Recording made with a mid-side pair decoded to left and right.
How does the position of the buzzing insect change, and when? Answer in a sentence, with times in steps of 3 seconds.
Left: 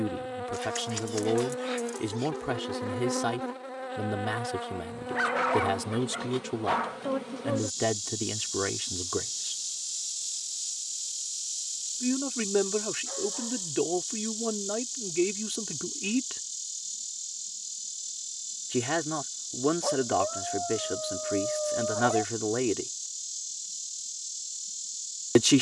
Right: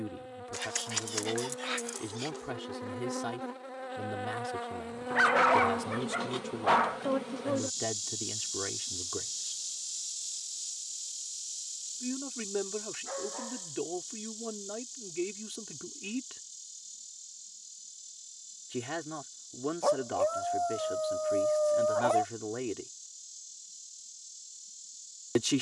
You can hear the buzzing insect on the left from 0 s, in the centre from 3 s and on the left from 9 s.